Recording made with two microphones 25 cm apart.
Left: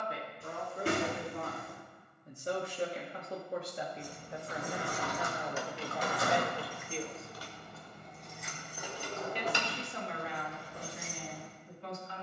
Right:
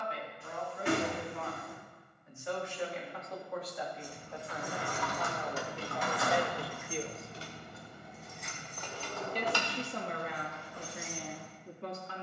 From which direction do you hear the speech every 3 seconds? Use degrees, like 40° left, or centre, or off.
40° left, 20° left, 10° right, 50° right.